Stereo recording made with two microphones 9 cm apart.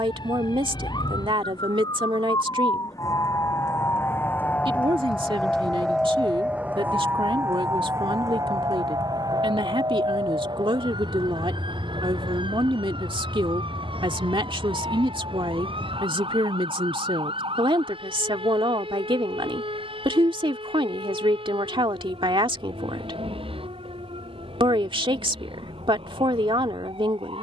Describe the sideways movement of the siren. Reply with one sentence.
You can hear the siren travel towards the right.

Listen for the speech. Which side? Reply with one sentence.
In this clip you hear the speech on the right.